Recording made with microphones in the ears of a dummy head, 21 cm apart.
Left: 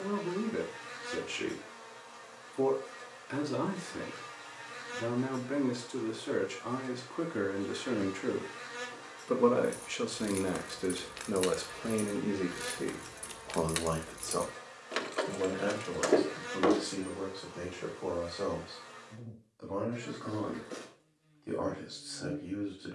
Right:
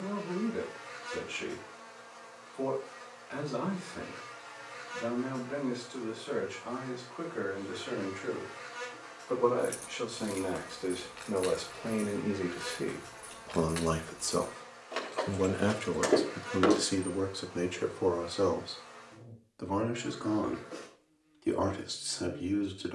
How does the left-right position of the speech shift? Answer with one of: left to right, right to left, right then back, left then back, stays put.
left to right.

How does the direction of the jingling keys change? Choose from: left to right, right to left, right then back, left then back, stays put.
left then back.